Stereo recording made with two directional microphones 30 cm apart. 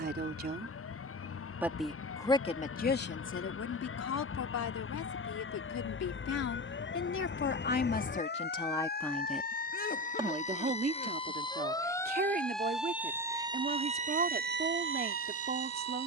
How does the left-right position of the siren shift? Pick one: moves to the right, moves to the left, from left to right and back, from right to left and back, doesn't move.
moves to the right.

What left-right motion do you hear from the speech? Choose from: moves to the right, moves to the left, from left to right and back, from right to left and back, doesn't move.
from right to left and back.